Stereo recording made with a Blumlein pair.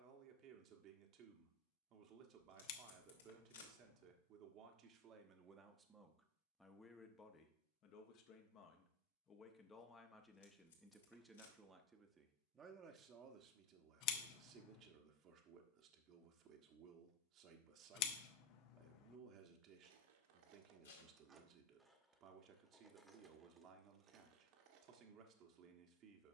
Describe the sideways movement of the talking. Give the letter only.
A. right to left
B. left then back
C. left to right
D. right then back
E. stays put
B.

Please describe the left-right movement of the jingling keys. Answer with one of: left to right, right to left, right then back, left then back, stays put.
left then back.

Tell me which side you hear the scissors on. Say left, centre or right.
left.